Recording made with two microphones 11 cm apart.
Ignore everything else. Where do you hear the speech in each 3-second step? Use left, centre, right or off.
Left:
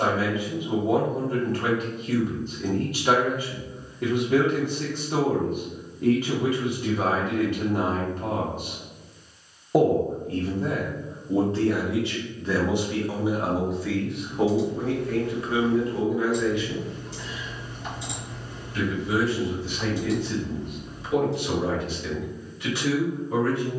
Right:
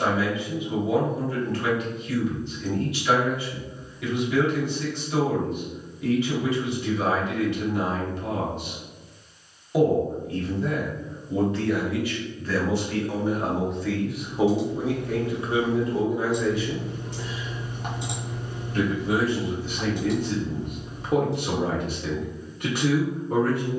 left, left, left, left, centre, right, right, right.